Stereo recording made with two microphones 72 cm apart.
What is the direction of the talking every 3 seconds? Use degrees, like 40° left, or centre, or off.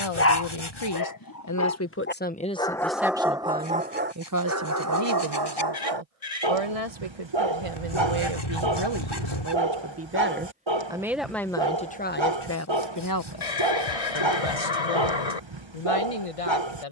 20° left, 30° right, 40° right, 10° right, 30° left, 50° left.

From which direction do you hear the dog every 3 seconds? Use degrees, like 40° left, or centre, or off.
20° left, 20° right, 40° right, 40° right, 40° right, 40° right.